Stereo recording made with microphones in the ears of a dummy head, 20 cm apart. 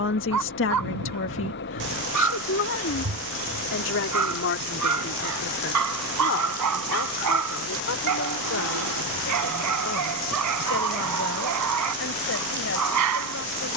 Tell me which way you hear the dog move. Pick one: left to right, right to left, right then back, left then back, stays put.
stays put.